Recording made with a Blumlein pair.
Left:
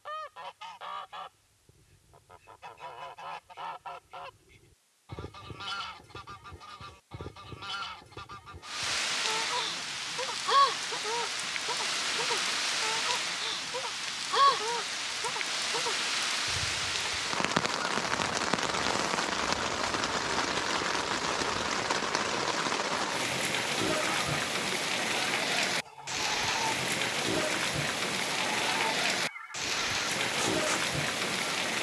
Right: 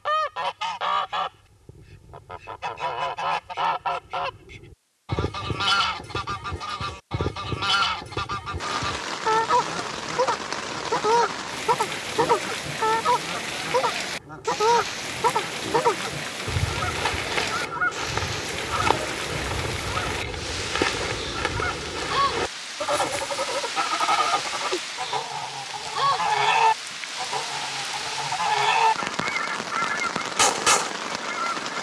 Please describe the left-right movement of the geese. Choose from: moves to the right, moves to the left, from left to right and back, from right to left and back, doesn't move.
doesn't move.